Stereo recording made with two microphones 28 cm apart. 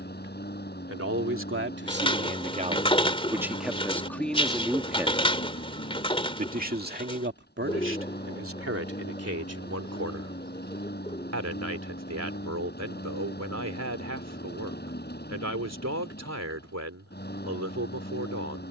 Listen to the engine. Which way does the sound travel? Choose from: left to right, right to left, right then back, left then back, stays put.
stays put.